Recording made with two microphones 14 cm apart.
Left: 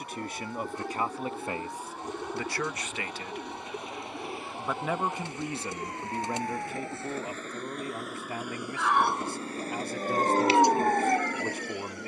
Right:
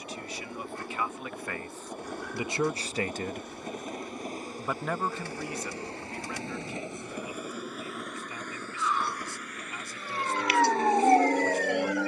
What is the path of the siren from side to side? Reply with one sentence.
In this clip you hear the siren travel towards the right.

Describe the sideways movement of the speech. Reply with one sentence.
In this clip you hear the speech go right and come back.